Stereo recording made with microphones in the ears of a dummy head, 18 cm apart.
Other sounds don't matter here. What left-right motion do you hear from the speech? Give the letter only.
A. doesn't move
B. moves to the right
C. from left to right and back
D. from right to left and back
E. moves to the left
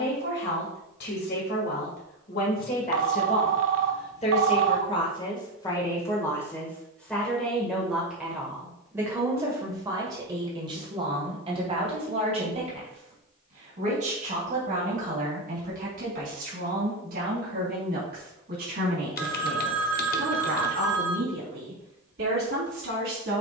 B.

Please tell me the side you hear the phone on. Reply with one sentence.
In this clip you hear the phone on the right.